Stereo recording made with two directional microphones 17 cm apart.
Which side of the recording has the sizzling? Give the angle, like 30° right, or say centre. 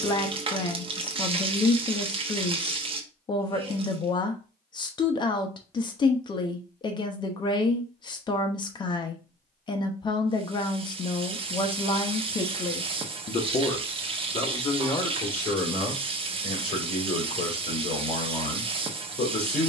30° right.